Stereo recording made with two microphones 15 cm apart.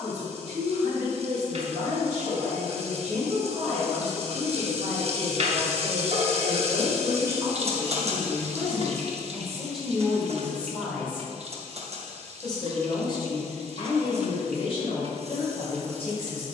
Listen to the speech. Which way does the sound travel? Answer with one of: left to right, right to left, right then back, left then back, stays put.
right to left.